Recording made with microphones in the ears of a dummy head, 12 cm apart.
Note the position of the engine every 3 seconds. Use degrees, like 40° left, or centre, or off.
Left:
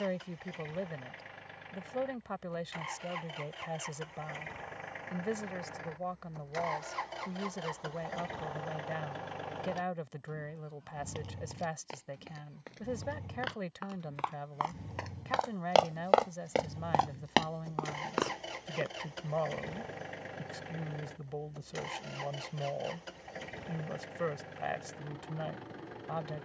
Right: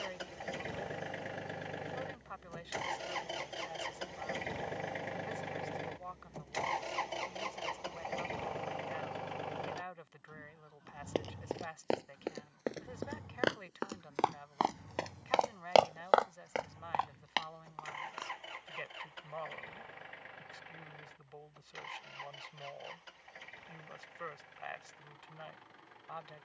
50° right, 40° right, 20° right, centre, 20° left, 40° left, 40° left, 50° left, 50° left.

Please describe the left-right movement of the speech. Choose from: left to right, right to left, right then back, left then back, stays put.
stays put.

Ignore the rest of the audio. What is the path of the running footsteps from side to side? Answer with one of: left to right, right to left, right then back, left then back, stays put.
right to left.